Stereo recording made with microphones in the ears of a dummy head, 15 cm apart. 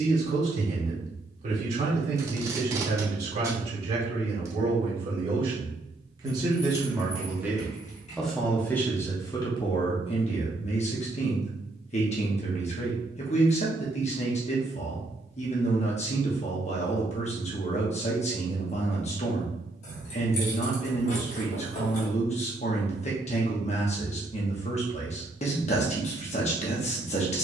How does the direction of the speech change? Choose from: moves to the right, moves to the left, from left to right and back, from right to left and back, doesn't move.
moves to the left.